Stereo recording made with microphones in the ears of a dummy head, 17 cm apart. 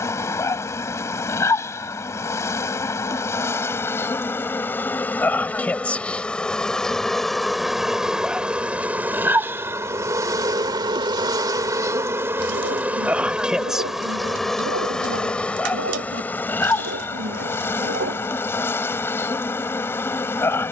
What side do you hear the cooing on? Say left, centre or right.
right.